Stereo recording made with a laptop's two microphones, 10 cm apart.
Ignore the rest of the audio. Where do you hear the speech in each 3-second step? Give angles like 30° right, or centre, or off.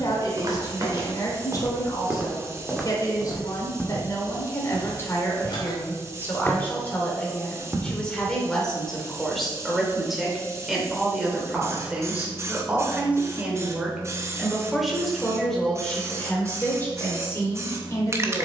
40° left, 30° left, 10° left, centre, 10° right, 20° left.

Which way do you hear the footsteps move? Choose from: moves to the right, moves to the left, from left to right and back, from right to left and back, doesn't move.
from right to left and back.